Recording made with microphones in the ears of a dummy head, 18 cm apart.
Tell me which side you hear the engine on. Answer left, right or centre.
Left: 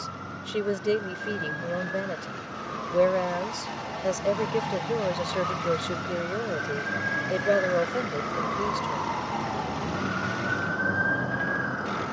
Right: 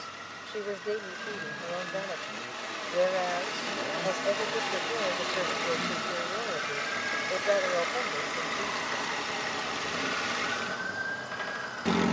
right.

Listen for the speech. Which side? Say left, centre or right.
left.